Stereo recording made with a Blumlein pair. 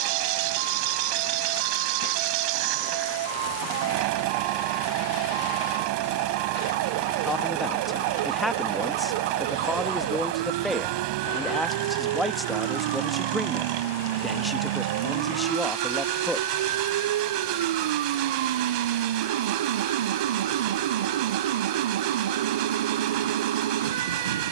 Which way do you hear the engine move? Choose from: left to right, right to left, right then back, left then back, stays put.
stays put.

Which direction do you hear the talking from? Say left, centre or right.
centre.